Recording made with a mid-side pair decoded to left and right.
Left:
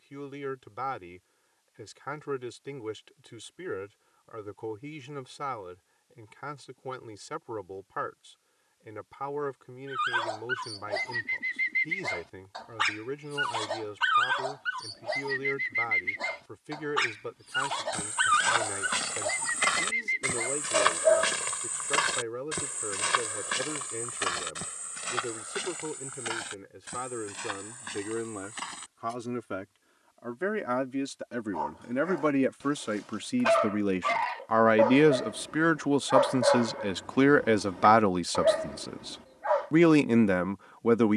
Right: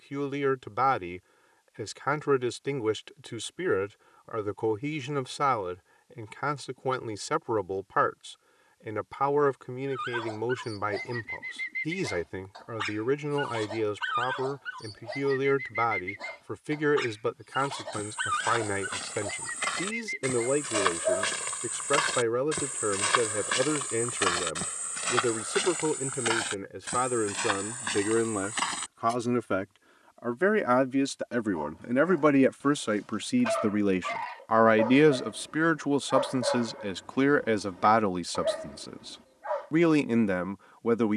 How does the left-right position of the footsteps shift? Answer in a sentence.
You can hear the footsteps travel towards the right.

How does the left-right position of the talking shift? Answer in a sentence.
In this clip you hear the talking move from right to left.